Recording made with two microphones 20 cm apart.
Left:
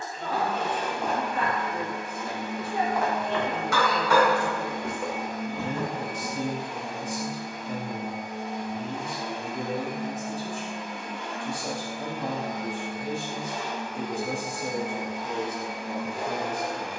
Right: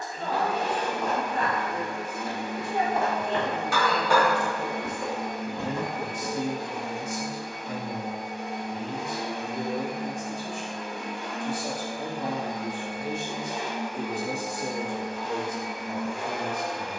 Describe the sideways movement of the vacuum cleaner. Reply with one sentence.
You can hear the vacuum cleaner travel towards the left.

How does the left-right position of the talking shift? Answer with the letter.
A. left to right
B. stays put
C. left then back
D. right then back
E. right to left
C.